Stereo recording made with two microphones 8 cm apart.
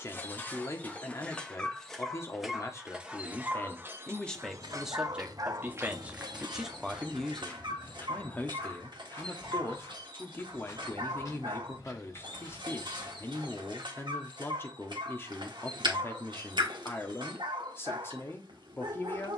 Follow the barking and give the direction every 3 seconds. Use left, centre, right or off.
centre, right, right, right, right, right, right.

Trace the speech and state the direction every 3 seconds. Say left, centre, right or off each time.
left, centre, centre, left, left, left, left.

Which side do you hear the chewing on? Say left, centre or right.
right.